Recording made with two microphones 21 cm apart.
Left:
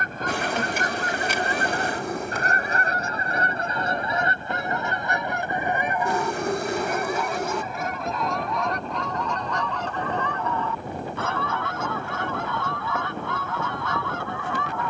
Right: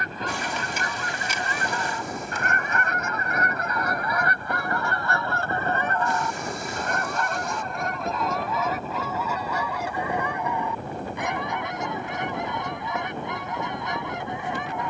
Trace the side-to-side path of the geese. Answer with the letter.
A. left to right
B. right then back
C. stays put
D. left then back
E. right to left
A.